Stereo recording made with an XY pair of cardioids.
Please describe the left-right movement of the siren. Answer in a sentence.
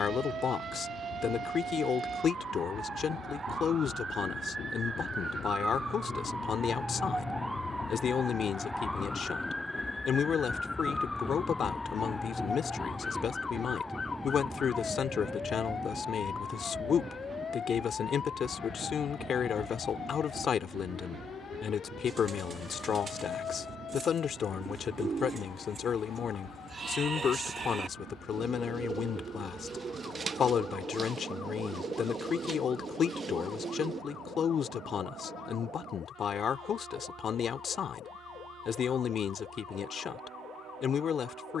In this clip you hear the siren go from the right side to the left.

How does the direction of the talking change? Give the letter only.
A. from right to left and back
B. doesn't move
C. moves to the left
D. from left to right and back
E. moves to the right
B.